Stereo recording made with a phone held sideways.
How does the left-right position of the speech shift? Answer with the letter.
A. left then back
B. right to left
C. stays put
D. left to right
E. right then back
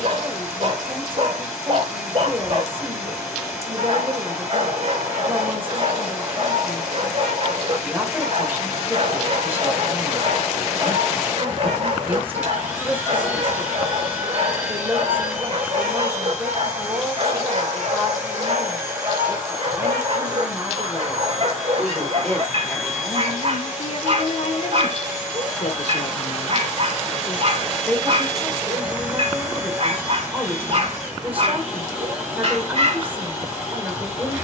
A.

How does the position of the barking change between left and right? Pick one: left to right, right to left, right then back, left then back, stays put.
stays put.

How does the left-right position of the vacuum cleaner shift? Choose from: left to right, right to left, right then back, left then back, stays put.
stays put.